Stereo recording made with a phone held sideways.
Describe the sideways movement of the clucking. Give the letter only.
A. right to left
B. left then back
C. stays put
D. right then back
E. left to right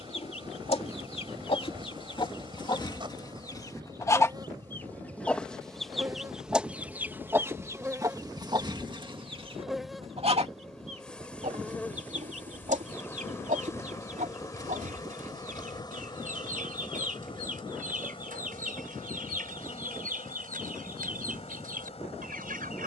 E.